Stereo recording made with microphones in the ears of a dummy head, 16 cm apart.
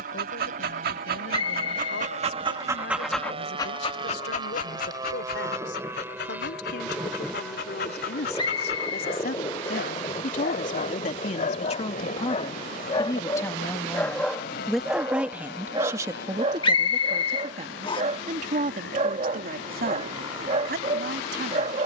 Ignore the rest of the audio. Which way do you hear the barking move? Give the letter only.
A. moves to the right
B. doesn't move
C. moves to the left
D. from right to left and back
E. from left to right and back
D.